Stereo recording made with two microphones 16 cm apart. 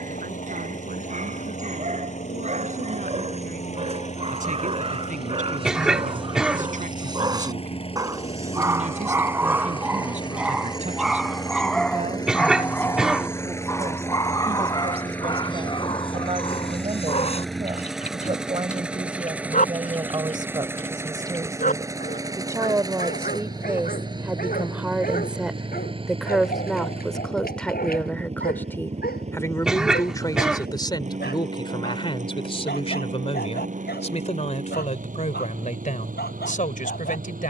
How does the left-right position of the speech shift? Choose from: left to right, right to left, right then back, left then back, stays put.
right to left.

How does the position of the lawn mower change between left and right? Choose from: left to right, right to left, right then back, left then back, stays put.
left to right.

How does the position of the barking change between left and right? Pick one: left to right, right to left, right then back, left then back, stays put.
right to left.